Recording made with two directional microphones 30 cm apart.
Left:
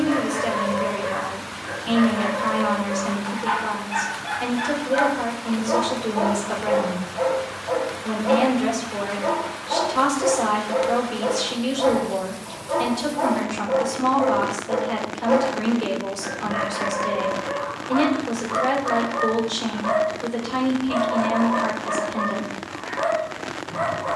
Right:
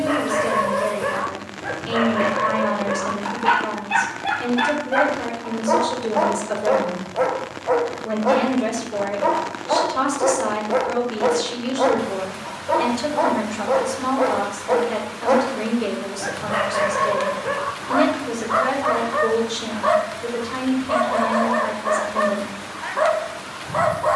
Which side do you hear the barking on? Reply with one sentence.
In this clip you hear the barking on the right.